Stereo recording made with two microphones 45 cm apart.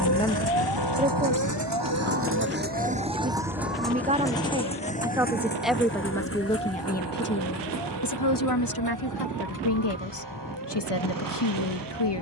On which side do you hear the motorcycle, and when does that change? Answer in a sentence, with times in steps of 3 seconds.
You can hear the motorcycle on the right from 0 s, in the centre from 3 s and on the left from 6 s.